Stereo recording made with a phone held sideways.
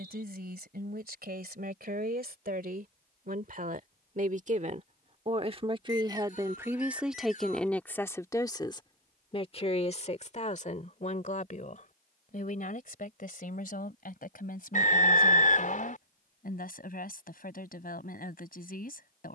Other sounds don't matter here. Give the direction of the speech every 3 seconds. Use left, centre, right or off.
right, right, centre, left, left, left, left.